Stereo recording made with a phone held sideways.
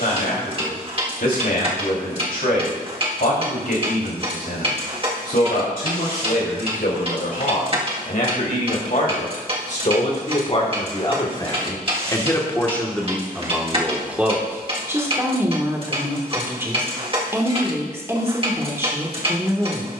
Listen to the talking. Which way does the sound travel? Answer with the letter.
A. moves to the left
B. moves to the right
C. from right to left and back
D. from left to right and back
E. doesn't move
B.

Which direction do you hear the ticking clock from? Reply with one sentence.
In this clip you hear the ticking clock on the right.